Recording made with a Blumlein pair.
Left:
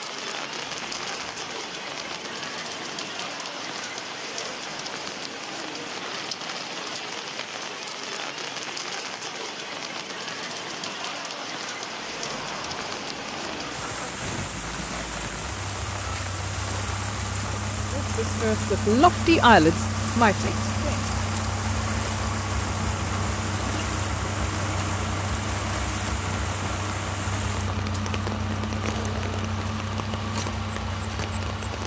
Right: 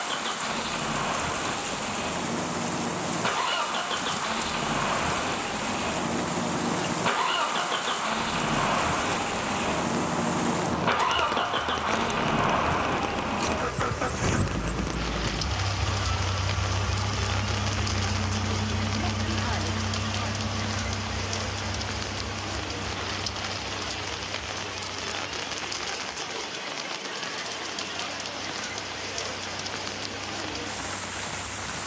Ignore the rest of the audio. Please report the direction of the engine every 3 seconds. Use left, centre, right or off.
right, right, right, right, right, centre, centre, left, left, left, left.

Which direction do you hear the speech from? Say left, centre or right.
left.